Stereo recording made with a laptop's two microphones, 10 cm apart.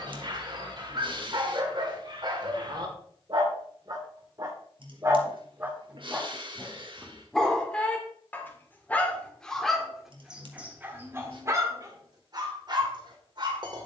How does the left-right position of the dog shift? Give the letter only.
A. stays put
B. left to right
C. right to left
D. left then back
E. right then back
D.